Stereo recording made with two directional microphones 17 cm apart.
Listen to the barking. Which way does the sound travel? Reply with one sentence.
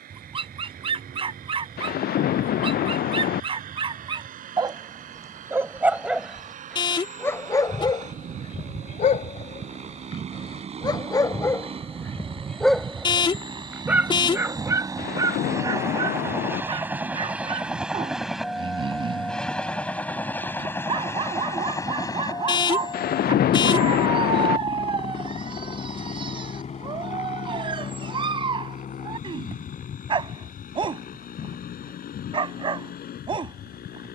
You can hear the barking go left and come back.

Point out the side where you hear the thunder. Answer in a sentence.
You can hear the thunder on the left.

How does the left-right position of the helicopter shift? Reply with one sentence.
You can hear the helicopter move from right to left.